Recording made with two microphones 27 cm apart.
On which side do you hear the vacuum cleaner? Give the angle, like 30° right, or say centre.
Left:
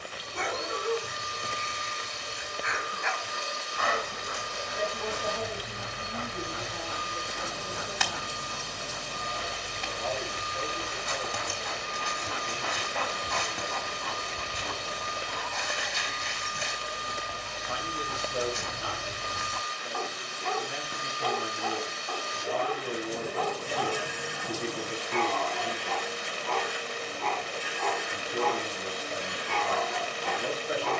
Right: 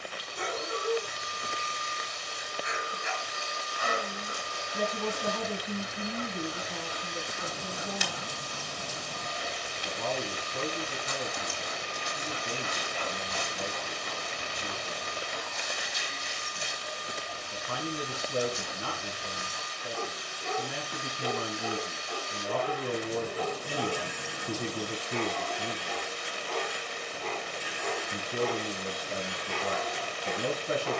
70° left.